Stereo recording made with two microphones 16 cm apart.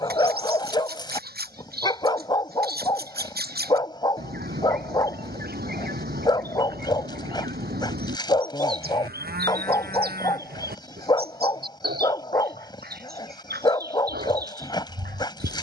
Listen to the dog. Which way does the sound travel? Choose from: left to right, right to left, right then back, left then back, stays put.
stays put.